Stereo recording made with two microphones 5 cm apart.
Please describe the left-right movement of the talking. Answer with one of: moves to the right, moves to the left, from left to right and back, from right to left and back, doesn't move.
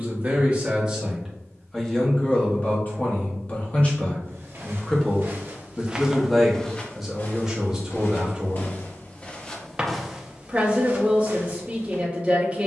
from right to left and back.